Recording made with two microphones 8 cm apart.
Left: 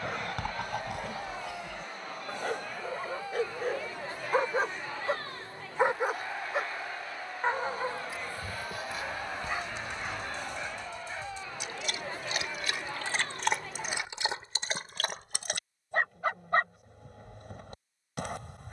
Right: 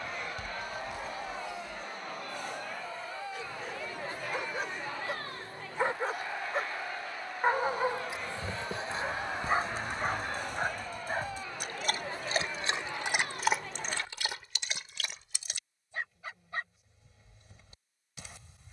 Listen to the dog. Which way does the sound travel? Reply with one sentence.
You can hear the dog move from left to right and back again.